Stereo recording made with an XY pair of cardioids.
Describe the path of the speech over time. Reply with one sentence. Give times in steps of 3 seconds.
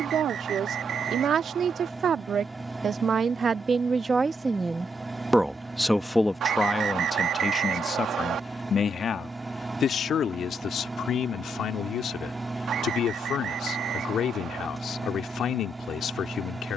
In this clip you hear the speech on the right from 0 s and on the left from 6 s.